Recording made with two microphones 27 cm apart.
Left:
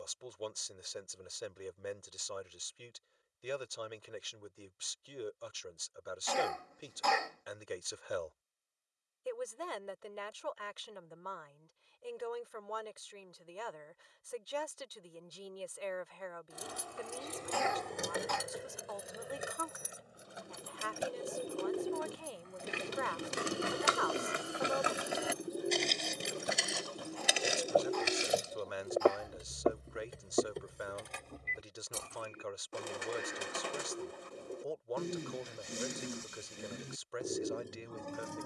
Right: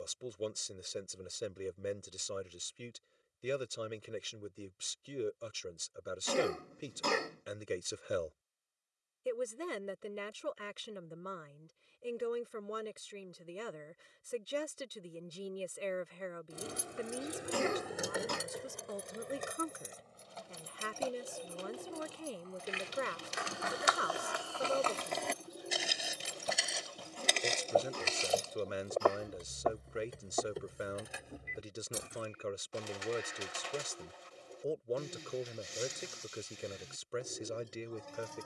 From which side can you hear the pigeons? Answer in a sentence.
You can hear the pigeons on the left.